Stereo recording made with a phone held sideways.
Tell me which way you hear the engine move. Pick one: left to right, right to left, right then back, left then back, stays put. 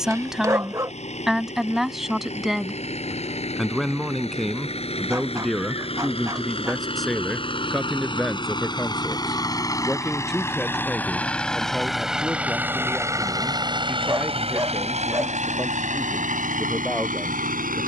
left to right.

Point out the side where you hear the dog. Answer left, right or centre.
right.